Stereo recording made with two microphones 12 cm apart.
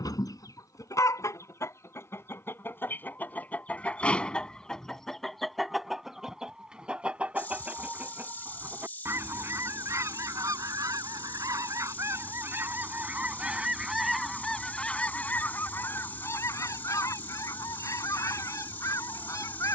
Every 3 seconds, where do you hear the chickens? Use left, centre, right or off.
left, centre, centre, right, centre, left, left.